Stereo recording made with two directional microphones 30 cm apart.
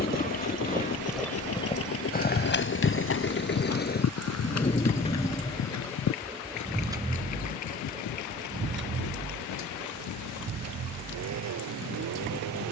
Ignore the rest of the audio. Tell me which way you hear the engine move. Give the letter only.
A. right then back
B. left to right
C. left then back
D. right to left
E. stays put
B.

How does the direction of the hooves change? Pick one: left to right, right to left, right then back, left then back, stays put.
right to left.